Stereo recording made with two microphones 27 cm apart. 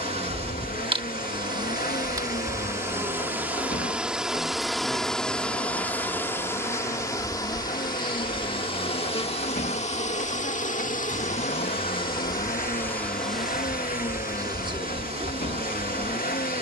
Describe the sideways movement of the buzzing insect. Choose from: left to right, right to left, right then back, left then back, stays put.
left then back.